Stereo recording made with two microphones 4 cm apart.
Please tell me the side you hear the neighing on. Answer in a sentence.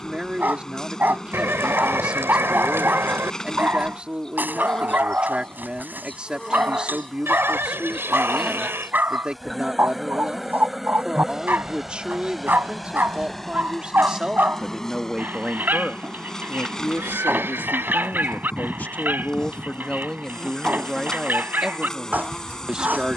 In this clip you hear the neighing on the right.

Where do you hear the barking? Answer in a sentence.
In this clip you hear the barking on the right.